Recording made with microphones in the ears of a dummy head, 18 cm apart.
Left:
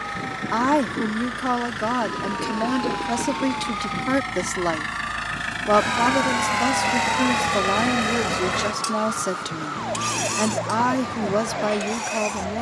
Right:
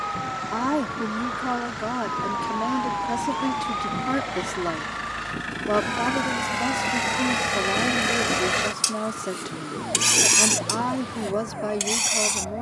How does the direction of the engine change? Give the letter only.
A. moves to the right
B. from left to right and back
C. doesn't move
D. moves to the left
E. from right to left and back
A.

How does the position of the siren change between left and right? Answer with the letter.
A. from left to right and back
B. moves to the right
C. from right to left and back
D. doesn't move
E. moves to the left
E.